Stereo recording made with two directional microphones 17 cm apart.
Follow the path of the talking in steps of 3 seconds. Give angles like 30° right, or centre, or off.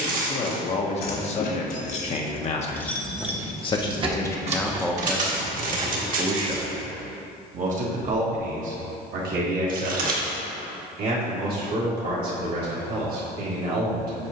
40° left, 10° left, 40° right, 60° right, 60° right.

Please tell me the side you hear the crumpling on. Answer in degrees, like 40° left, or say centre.
50° right.